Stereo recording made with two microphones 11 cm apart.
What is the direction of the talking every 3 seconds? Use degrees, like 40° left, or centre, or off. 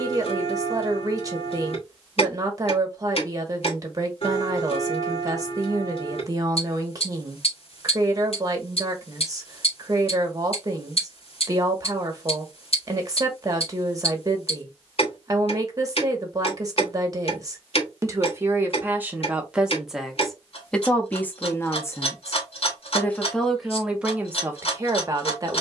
30° right, 30° right, 30° right, 30° right, 30° right, 30° right, 10° right, 10° left, 20° right.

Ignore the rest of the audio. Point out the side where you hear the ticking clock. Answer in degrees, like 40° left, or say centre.
60° left.